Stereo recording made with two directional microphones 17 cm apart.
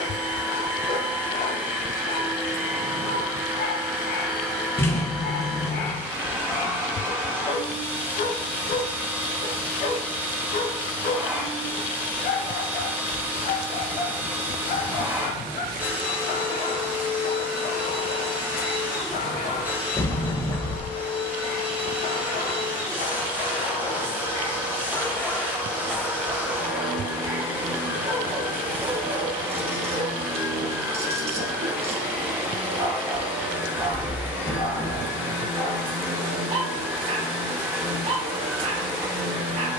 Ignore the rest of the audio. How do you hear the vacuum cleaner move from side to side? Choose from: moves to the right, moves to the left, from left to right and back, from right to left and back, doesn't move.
doesn't move.